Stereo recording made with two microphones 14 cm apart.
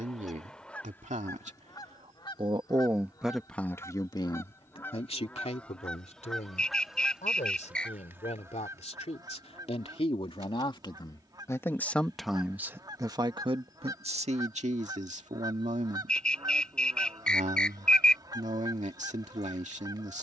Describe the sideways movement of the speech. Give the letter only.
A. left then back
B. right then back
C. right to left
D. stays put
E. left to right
A.